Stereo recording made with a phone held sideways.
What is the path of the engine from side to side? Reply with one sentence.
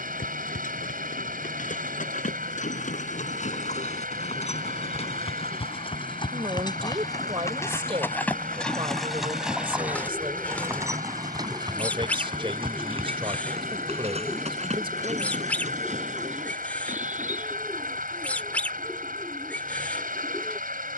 You can hear the engine stay put.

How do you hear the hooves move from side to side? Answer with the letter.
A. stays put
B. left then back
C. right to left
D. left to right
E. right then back
D.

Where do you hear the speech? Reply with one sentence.
You can hear the speech on the right.